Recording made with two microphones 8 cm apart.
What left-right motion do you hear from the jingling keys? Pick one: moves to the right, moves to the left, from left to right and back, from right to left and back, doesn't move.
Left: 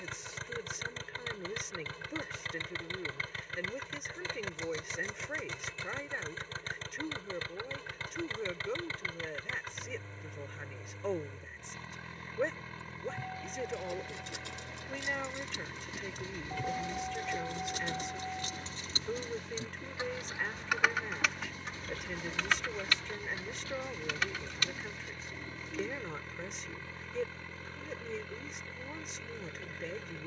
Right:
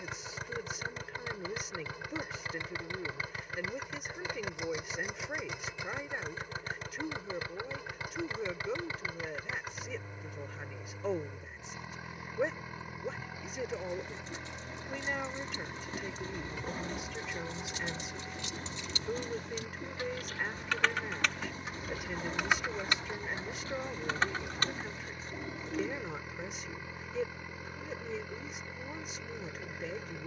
moves to the right.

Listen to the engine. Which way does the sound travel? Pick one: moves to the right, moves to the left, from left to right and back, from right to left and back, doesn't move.
doesn't move.